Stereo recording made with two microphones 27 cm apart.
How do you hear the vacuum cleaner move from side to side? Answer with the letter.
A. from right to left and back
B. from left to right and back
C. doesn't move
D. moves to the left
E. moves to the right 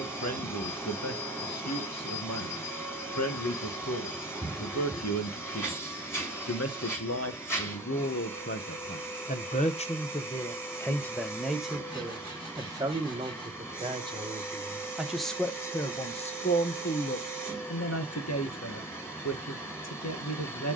C.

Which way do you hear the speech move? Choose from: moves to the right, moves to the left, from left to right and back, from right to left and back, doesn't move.
from left to right and back.